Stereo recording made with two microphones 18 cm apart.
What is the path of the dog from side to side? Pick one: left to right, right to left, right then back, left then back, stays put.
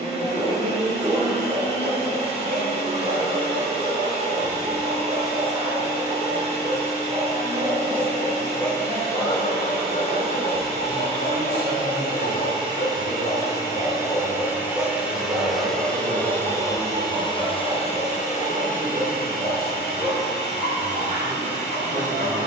left then back.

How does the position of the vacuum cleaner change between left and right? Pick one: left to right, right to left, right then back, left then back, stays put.
right to left.